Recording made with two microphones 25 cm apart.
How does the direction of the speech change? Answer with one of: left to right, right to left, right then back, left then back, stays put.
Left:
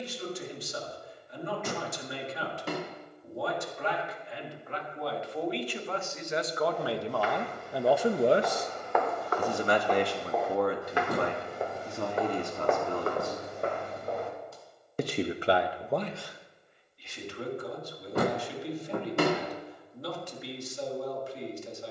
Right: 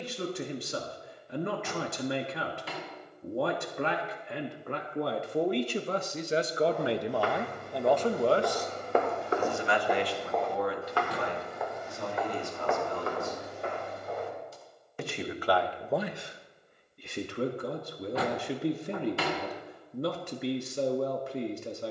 left then back.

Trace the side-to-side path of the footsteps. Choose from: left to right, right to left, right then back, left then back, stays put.
right to left.